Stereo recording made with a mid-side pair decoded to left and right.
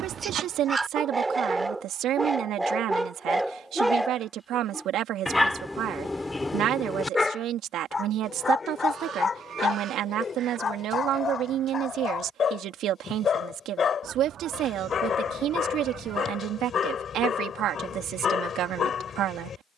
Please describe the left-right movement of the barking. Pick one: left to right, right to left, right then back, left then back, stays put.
right to left.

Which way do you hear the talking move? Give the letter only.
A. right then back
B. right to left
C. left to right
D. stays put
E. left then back
D.